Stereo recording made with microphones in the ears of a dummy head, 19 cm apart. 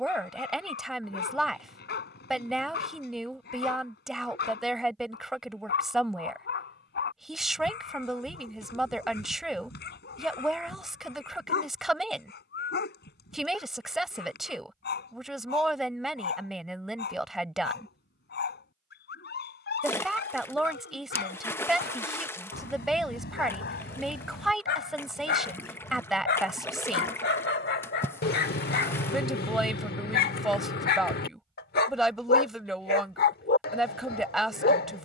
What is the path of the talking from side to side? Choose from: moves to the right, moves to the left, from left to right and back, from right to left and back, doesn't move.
doesn't move.